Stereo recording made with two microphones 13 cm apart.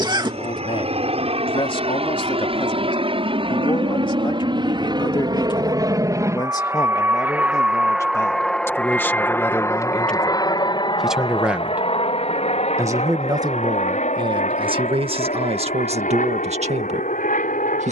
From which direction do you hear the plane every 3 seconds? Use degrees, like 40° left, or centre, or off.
60° right, 40° right, 10° right, 30° left, 60° left, 70° left.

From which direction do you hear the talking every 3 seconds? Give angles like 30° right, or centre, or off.
50° left, 40° left, 30° left, centre, 30° right, 60° right.